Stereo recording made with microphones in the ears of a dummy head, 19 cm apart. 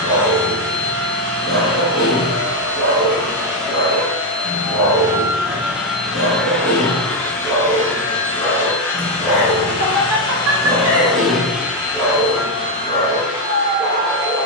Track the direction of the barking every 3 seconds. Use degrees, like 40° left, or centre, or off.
20° left, 20° left, 10° left, 10° right, 10° left.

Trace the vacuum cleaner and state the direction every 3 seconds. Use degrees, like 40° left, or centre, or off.
50° right, 20° right, 20° left, 10° left, 30° right.